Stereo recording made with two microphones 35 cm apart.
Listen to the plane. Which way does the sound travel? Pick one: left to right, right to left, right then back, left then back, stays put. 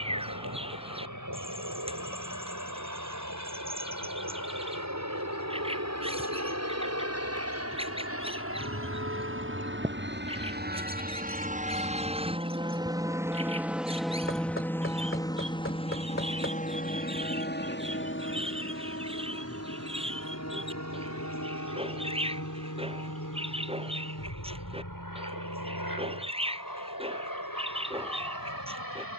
right to left.